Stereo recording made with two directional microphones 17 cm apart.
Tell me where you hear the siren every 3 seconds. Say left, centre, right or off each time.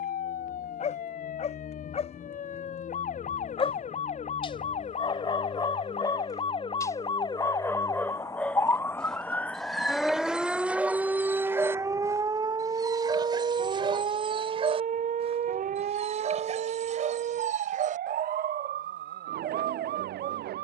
left, left, left, centre, right, right, right.